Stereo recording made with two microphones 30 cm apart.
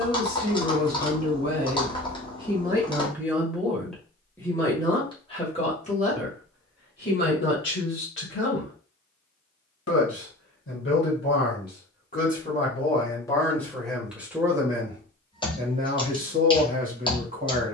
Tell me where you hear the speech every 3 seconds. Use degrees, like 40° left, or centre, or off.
30° right, 10° left, 40° left, 40° left, 10° left, 30° right.